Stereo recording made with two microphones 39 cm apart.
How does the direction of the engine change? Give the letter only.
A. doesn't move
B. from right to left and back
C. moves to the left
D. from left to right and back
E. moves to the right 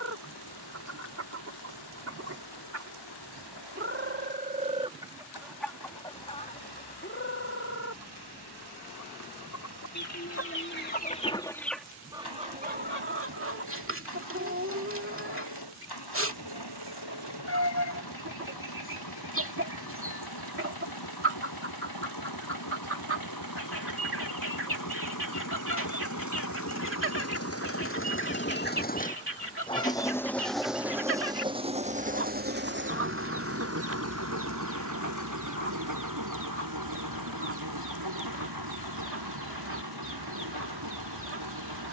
E.